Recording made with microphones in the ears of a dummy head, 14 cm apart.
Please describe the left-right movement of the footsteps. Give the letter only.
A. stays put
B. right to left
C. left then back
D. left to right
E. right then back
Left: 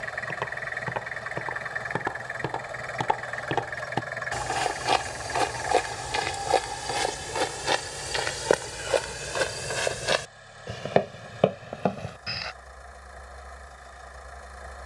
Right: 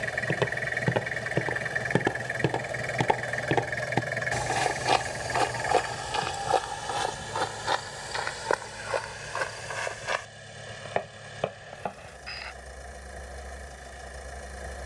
B.